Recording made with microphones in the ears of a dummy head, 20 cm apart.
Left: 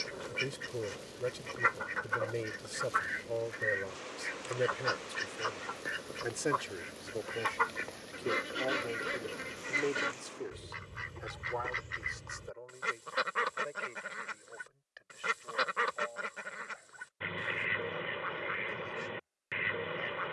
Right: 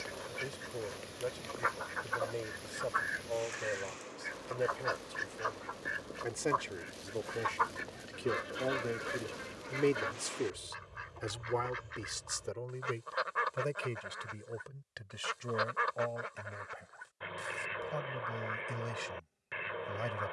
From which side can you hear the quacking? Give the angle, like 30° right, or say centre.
40° left.